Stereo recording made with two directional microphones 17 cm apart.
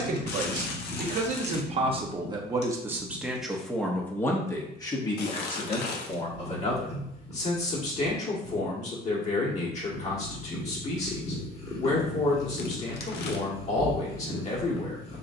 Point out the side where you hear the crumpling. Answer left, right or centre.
left.